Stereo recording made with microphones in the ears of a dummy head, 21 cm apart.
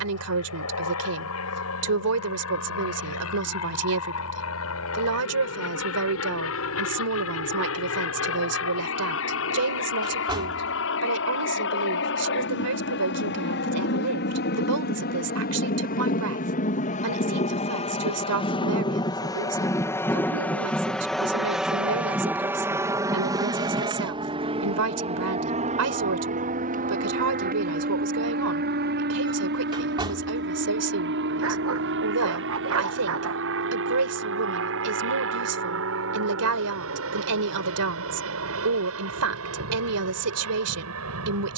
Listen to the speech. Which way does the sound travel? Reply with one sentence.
You can hear the speech stay put.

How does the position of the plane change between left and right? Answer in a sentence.
You can hear the plane move to the right.